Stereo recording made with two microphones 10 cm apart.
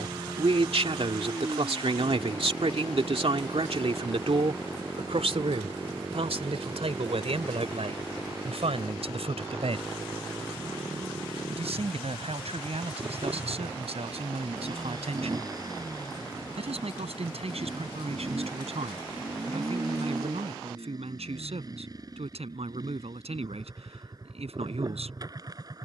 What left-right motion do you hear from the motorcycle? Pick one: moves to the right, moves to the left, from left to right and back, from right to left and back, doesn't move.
doesn't move.